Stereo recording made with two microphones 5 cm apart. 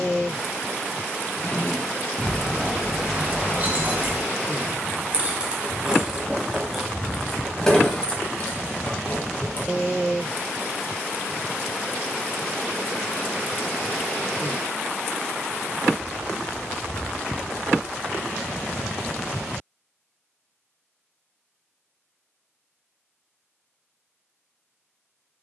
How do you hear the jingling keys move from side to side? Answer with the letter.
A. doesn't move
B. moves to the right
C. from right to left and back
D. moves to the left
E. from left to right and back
E.